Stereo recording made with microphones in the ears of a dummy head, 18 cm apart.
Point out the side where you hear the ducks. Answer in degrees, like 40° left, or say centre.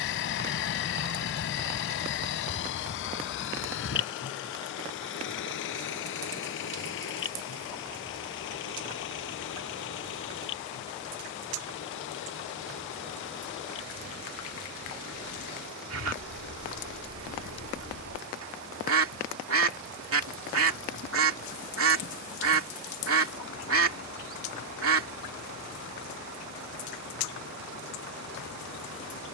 80° right.